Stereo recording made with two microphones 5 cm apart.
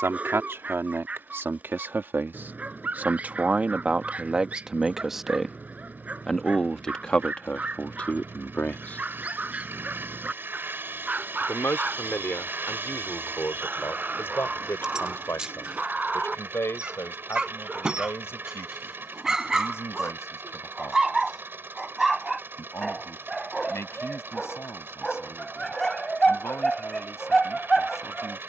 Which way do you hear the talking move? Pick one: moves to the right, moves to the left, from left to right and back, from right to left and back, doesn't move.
moves to the left.